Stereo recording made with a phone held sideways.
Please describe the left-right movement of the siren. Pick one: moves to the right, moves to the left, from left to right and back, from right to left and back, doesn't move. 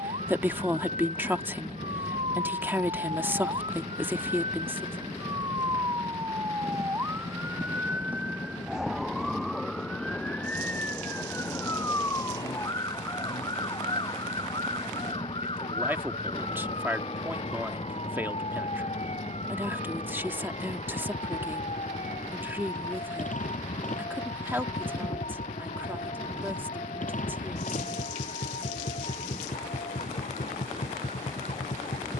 moves to the left.